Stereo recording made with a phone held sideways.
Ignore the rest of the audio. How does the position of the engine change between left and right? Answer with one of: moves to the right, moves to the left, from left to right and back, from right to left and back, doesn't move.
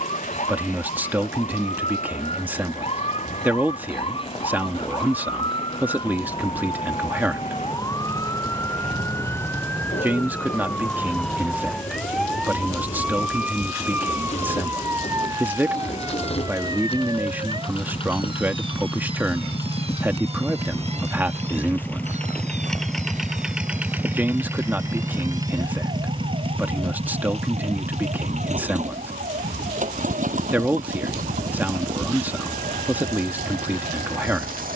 moves to the right.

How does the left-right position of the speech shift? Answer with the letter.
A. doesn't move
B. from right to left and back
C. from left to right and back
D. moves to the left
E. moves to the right
A.